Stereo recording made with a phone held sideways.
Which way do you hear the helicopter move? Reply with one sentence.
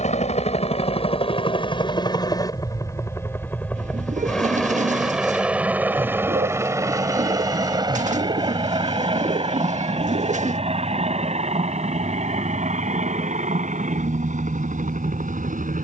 You can hear the helicopter go from the left side to the right.